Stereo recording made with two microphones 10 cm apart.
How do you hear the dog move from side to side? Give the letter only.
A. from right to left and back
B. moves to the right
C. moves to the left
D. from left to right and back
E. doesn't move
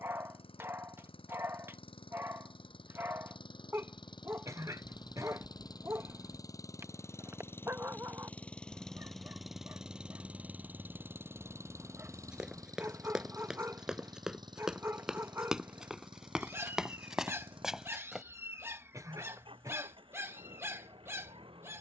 E.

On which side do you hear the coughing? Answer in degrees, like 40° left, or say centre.
30° right.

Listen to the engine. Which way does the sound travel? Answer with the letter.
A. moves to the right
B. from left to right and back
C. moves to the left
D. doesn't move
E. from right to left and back
A.